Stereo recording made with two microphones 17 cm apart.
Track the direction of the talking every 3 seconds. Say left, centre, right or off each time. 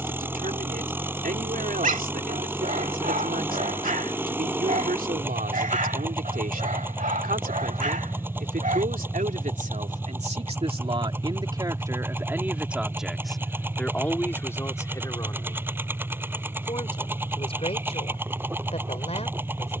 right, right, right, right, centre, left, left.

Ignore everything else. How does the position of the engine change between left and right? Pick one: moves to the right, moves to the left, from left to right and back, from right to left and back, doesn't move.
doesn't move.